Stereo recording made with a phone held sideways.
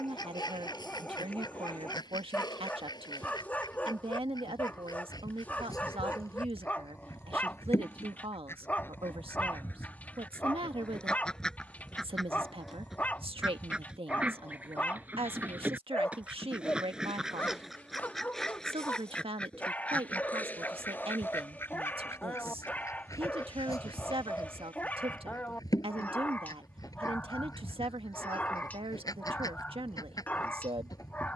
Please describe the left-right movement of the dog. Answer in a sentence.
In this clip you hear the dog stay in one place.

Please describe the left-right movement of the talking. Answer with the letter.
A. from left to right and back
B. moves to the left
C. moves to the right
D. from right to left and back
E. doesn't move
E.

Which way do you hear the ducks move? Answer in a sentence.
You can hear the ducks move from left to right and back again.